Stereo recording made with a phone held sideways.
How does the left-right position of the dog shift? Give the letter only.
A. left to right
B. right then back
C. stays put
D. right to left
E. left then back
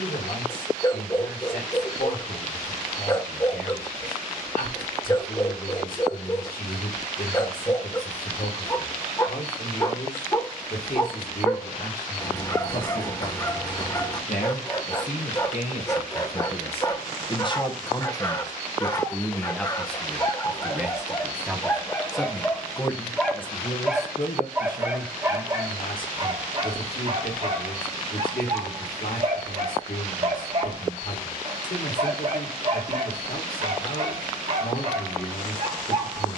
A.